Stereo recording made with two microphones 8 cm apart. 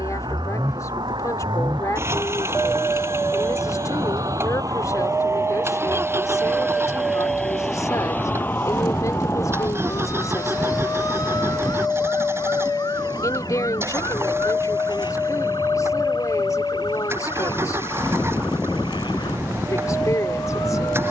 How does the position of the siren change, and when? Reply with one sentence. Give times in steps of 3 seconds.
You can hear the siren on the right from 0 s, in the centre from 6 s and on the left from 9 s.